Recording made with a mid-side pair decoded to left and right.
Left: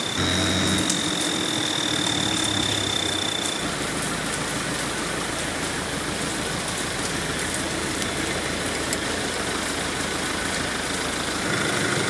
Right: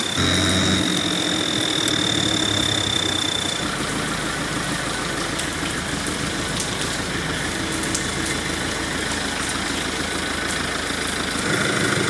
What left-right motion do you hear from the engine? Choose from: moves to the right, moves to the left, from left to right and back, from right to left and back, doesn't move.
doesn't move.